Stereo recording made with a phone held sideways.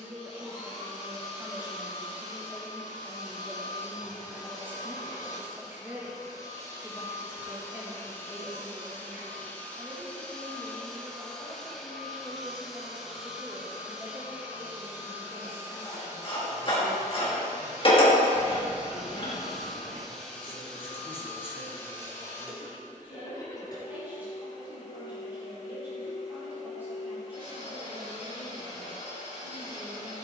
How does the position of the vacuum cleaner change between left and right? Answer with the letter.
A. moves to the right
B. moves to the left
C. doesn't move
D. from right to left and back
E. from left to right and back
E.